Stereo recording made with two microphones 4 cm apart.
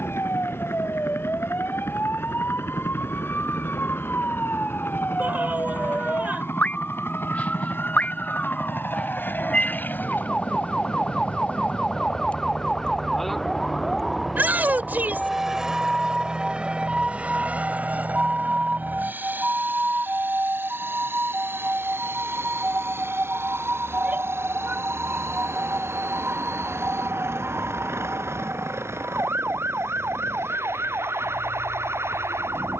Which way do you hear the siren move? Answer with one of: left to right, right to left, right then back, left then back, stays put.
left to right.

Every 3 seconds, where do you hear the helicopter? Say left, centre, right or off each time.
left, left, left, left, centre, right, right, right, right, right, right.